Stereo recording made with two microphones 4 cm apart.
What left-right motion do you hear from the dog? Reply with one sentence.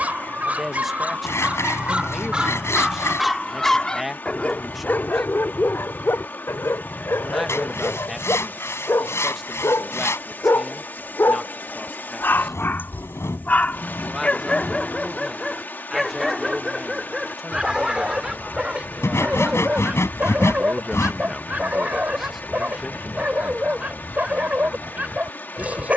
You can hear the dog go left and come back.